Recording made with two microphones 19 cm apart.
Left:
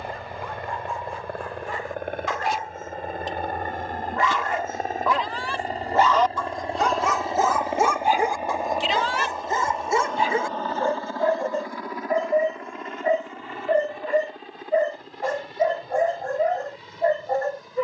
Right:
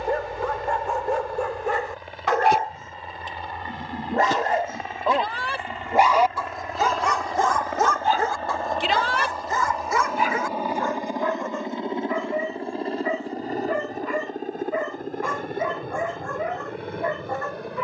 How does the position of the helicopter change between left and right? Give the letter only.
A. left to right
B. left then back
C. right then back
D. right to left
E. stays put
A.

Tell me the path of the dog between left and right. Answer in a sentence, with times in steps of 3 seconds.
You can hear the dog on the right from 0 s, in the centre from 6 s and on the left from 9 s.